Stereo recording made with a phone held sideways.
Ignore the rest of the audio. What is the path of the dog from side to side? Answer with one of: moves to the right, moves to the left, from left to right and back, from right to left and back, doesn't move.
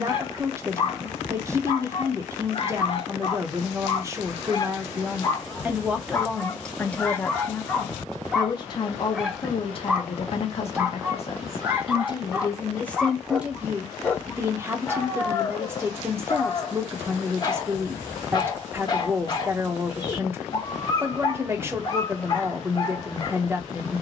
from left to right and back.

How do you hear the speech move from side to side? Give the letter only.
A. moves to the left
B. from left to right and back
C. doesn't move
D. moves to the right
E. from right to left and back
E.